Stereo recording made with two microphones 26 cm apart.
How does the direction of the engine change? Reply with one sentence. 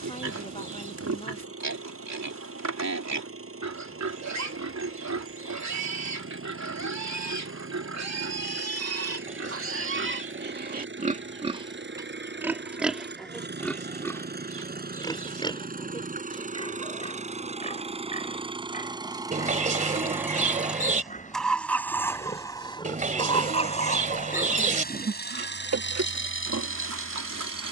You can hear the engine move from right to left.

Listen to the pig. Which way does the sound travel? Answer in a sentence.
In this clip you hear the pig move from right to left and back again.